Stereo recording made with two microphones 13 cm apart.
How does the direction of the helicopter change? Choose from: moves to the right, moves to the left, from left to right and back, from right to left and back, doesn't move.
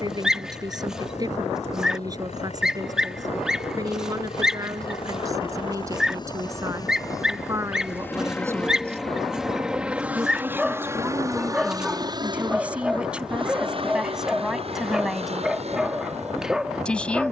moves to the right.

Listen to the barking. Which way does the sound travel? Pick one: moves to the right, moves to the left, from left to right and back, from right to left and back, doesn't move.
doesn't move.